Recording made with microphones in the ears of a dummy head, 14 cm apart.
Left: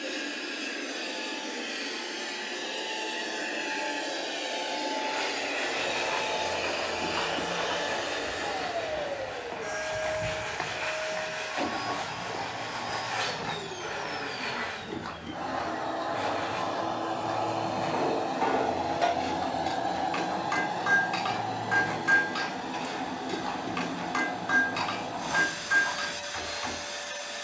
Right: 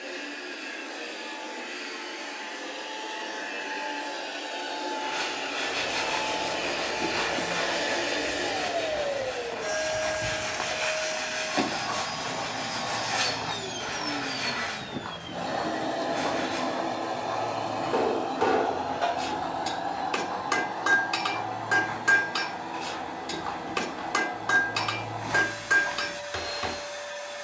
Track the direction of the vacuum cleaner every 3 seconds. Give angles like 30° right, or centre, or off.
50° left, 30° left, 10° right, 60° right, 60° right, 20° right, 30° left, 50° left, 50° left.